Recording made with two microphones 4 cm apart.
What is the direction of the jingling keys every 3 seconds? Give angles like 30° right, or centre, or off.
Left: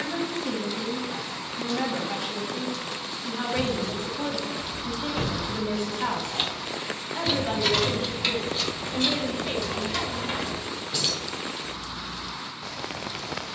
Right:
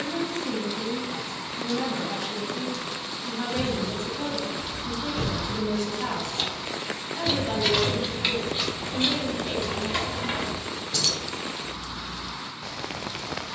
off, 50° left, centre, 10° right, off.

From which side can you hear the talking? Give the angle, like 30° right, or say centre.
30° left.